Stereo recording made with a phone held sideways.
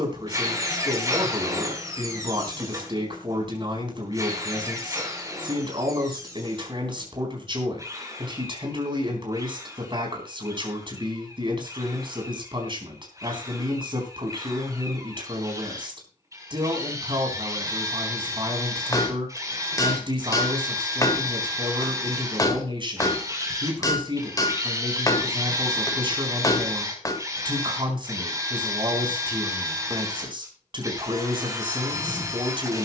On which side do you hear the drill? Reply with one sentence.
You can hear the drill on the right.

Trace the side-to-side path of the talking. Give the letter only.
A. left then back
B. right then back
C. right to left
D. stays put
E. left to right
D.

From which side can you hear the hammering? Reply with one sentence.
You can hear the hammering on the left.